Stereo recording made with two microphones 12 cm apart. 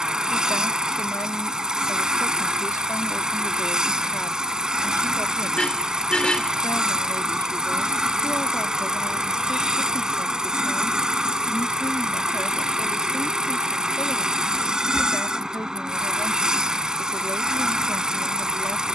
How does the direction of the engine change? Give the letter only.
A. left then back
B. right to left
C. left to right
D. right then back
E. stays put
E.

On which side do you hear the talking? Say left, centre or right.
left.